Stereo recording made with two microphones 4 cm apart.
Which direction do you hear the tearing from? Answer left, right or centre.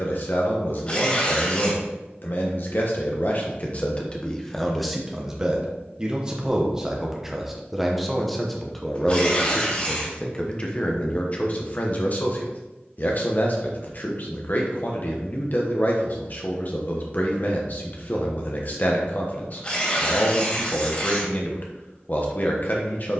left.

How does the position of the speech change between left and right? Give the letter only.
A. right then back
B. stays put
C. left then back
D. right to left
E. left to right
A.